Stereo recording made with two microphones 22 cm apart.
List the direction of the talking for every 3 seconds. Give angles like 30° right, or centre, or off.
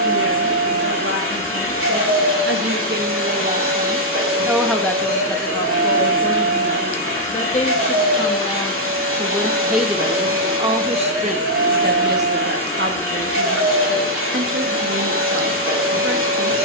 60° right, 10° right, 30° left, 20° right, 60° right, 70° right.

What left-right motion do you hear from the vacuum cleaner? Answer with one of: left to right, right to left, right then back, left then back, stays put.
stays put.